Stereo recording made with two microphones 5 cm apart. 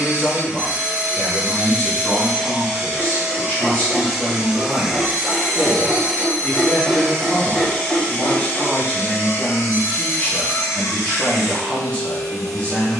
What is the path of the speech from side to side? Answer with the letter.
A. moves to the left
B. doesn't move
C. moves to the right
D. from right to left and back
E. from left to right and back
B.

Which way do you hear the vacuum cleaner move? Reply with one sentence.
You can hear the vacuum cleaner go from the right side to the left.